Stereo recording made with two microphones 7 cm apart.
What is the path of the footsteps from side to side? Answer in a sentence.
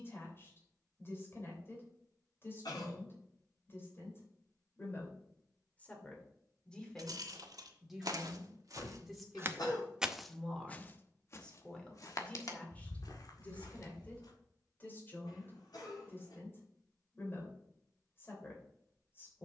You can hear the footsteps move to the left.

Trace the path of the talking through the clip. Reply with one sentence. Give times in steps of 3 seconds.
You can hear the talking on the left from 0 s, in the centre from 6 s and on the left from 12 s.